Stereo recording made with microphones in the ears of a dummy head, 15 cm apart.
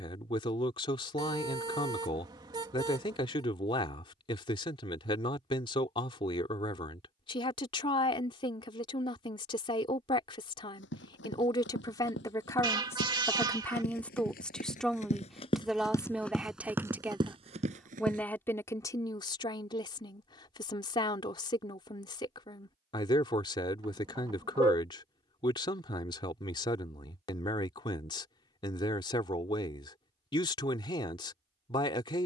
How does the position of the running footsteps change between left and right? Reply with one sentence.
In this clip you hear the running footsteps travel towards the right.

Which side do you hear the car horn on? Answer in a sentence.
You can hear the car horn on the right.